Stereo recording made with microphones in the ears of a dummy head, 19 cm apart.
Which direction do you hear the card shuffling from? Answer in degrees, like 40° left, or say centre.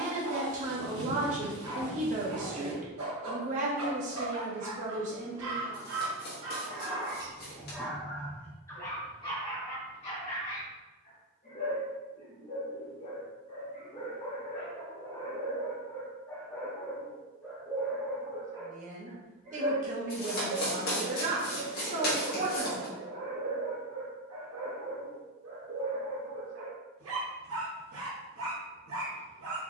50° left.